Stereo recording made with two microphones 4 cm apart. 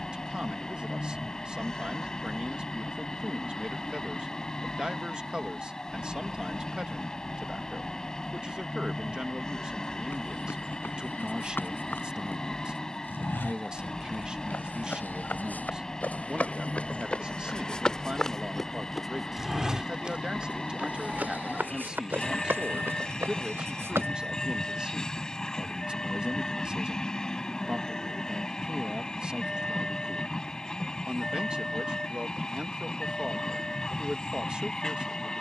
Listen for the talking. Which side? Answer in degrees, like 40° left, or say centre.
20° right.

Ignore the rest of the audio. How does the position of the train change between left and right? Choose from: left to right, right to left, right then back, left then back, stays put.
stays put.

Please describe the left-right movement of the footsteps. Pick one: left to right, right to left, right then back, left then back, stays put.
left to right.